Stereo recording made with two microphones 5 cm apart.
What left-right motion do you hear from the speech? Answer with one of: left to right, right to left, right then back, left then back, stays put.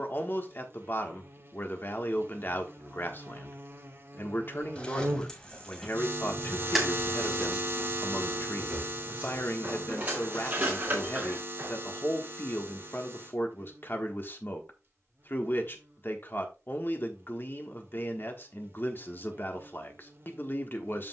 stays put.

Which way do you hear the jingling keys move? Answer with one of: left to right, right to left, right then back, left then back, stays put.
left to right.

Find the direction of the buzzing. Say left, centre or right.
right.